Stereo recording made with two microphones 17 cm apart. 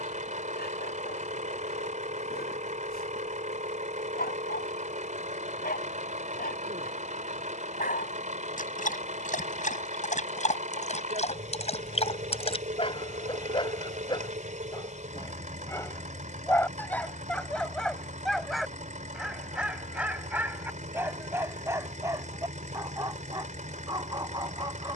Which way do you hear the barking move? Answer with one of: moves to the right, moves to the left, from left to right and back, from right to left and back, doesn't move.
moves to the right.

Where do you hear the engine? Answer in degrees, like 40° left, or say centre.
50° right.